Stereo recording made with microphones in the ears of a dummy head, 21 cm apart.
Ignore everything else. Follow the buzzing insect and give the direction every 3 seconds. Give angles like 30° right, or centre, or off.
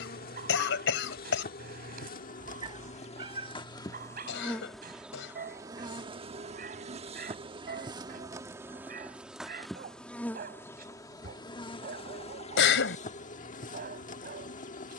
40° left, 10° left, 20° right, 10° left, 30° left.